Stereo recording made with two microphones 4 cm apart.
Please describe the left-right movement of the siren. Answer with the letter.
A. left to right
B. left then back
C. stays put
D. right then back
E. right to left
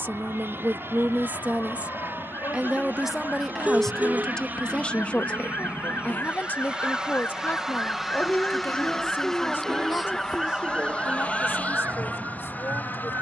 A.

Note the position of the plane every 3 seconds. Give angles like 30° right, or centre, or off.
60° right, 40° right, 10° right, 20° left, 40° left.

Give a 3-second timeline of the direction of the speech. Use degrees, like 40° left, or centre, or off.
40° right, 10° left, 50° left, 60° left, 70° left.